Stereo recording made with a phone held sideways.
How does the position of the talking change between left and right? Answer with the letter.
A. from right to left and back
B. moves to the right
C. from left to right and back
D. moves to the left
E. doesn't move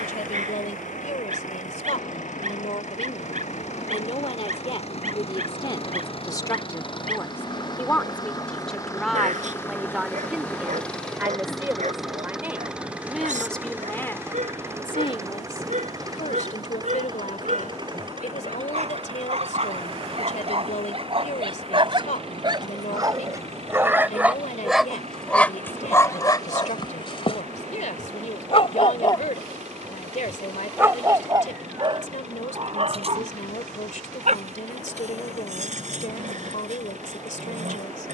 C.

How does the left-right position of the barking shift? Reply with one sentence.
In this clip you hear the barking go left and come back.